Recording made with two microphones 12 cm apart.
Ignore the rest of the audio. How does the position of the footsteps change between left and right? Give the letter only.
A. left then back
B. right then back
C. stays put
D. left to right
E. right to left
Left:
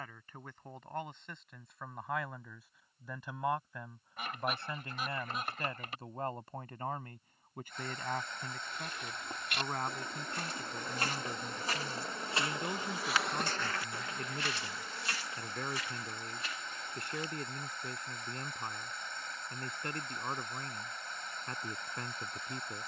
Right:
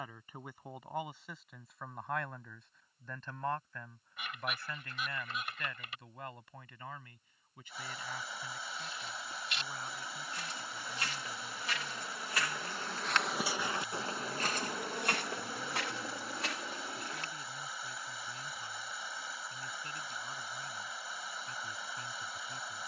D.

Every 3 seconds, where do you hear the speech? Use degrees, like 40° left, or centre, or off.
centre, 20° left, 50° left, 70° left, 70° left, 70° left, 70° left, 70° left.